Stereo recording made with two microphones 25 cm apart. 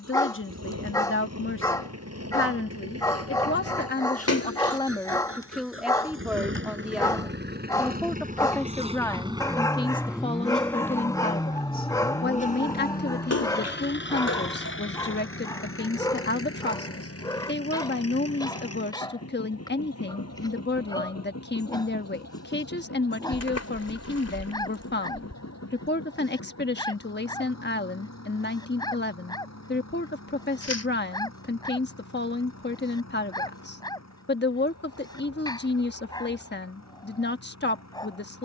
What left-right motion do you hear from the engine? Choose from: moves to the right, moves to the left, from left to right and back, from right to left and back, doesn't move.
moves to the left.